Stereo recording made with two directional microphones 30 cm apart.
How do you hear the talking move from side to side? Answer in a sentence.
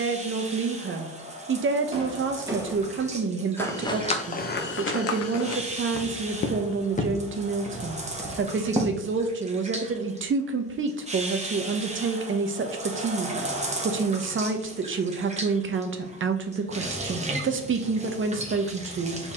In this clip you hear the talking stay put.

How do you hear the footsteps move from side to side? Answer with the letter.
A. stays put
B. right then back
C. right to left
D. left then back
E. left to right
D.